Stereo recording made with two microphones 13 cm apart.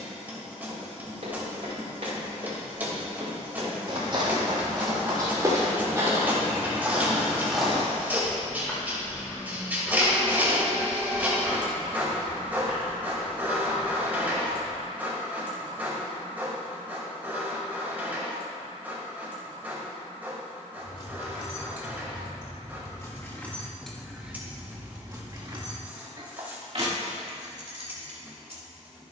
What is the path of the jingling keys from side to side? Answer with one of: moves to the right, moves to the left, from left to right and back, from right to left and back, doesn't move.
moves to the right.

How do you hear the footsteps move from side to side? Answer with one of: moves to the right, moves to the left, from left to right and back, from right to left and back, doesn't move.
moves to the left.